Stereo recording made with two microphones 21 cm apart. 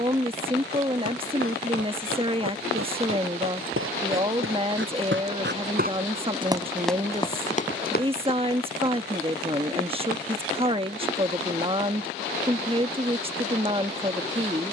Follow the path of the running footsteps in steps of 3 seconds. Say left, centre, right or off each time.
right, right, left, off, off.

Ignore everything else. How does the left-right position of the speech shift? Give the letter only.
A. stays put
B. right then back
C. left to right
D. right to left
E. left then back
A.